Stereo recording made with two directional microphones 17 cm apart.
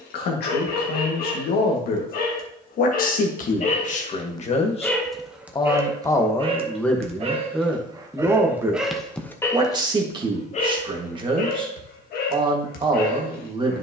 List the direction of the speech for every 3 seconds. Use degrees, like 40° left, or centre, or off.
70° left, 40° left, centre, 30° right, 30° right.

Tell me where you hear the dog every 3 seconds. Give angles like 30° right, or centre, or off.
60° left, 20° left, 20° right, 40° left, 60° left.